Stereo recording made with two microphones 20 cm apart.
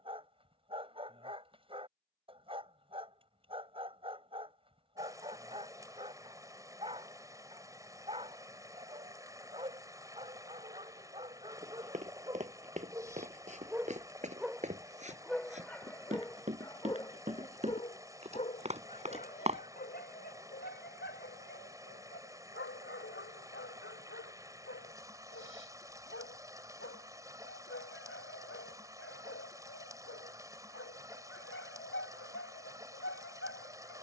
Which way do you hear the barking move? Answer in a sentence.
You can hear the barking go from the right side to the left.